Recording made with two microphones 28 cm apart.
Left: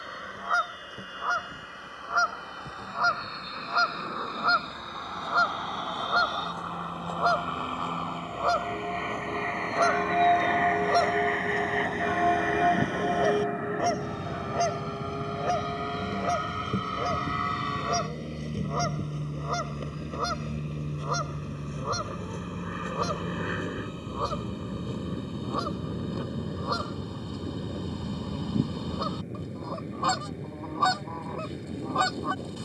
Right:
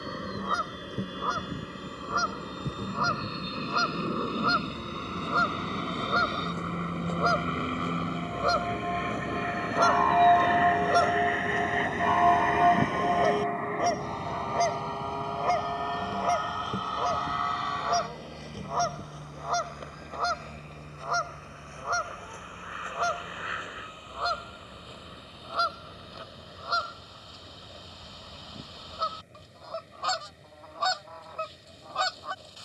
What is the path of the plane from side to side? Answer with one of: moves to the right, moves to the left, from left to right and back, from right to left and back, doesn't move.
moves to the left.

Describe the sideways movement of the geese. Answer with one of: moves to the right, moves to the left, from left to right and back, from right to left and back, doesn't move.
moves to the left.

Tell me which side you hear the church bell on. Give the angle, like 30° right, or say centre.
20° left.